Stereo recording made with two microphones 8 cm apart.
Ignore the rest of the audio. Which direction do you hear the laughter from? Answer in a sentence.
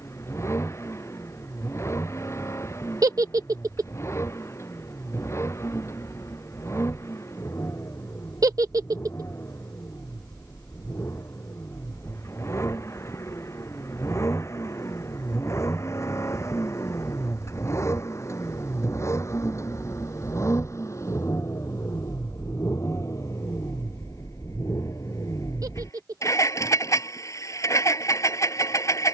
You can hear the laughter on the right.